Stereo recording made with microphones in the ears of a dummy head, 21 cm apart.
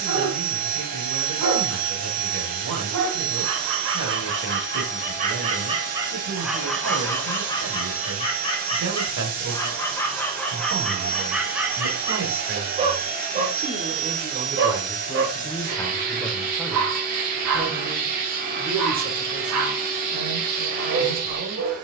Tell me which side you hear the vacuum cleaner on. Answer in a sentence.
In this clip you hear the vacuum cleaner on the right.